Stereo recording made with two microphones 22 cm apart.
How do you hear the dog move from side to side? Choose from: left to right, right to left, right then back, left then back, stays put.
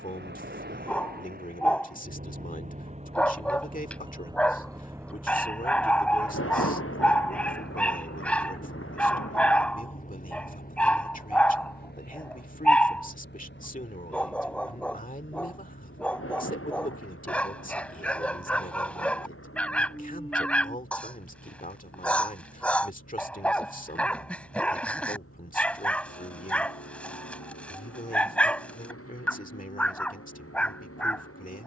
stays put.